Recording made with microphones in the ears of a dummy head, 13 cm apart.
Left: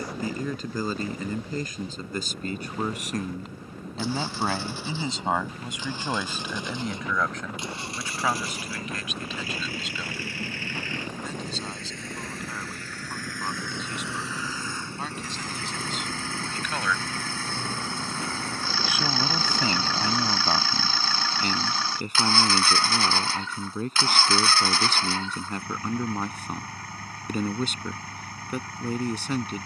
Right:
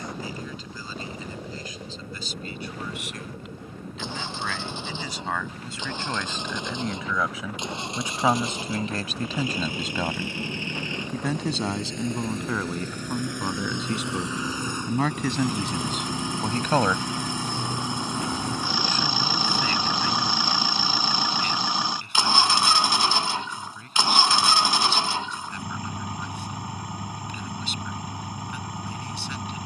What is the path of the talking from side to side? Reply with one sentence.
In this clip you hear the talking go right and come back.